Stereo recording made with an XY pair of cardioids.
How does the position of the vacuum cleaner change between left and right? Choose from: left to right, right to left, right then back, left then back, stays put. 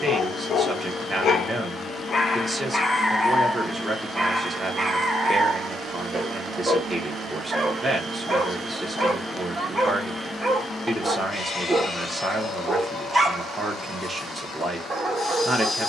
right then back.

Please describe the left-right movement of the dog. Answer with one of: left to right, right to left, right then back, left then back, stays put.
left to right.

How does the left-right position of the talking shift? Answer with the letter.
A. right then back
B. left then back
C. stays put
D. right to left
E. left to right
C.